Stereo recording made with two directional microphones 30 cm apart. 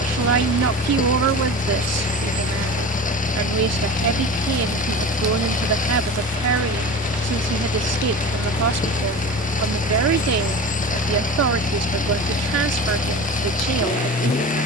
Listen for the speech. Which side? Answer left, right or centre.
right.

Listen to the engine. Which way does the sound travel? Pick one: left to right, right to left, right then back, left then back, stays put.
stays put.